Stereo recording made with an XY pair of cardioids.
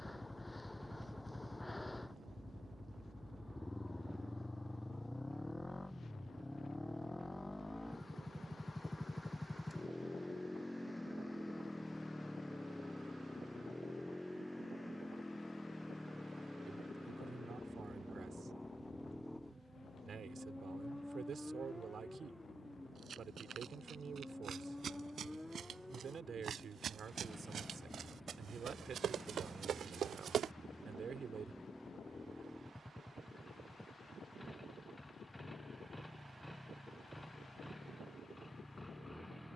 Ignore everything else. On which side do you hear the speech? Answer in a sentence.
You can hear the speech on the right.